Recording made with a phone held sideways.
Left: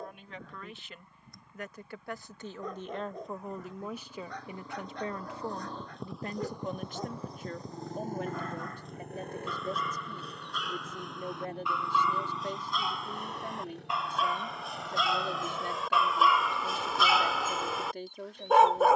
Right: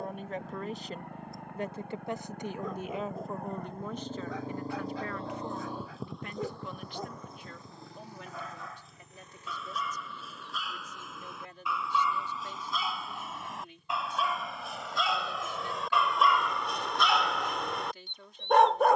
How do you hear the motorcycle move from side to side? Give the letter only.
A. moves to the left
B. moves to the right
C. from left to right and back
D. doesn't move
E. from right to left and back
A.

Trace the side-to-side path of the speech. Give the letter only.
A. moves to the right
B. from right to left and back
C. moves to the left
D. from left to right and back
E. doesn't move
C.